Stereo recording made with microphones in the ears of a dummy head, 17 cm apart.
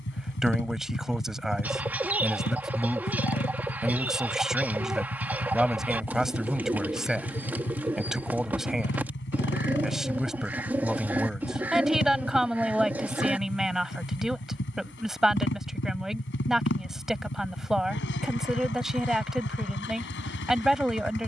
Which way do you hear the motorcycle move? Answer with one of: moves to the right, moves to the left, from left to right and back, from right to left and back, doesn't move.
doesn't move.